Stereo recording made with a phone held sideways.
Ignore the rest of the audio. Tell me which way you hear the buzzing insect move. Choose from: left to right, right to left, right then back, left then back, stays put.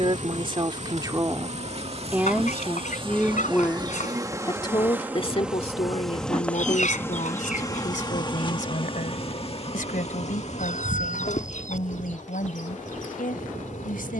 right to left.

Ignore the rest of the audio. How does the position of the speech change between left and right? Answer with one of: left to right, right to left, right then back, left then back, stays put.
right to left.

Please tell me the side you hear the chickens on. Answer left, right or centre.
left.